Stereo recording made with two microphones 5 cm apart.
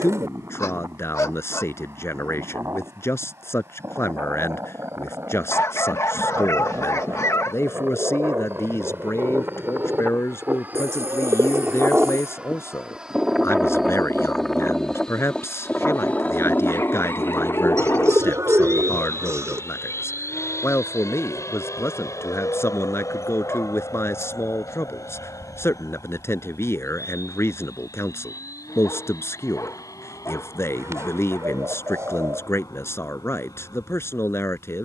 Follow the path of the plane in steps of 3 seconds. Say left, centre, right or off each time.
right, right, right, right, centre, left, left, left, left, left, left, left.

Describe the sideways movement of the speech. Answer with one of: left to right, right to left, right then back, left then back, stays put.
stays put.